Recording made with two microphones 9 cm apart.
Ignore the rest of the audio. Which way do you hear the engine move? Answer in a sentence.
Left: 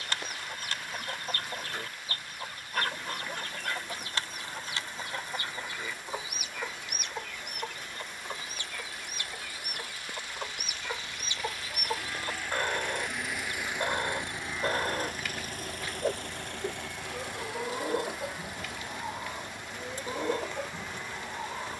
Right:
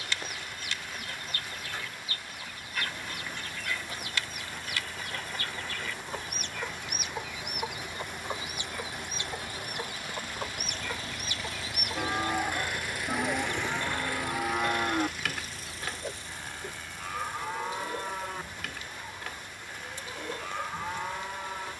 You can hear the engine go from the right side to the left.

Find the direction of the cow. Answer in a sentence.
In this clip you hear the cow on the right.